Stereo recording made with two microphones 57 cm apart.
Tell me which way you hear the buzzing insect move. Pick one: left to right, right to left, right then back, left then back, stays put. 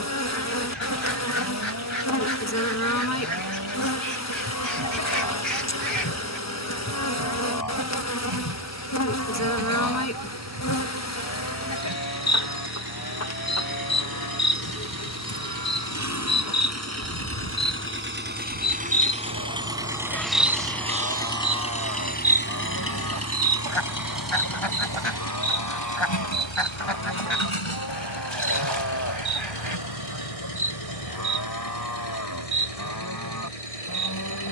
left to right.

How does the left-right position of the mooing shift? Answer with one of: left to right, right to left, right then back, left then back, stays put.
stays put.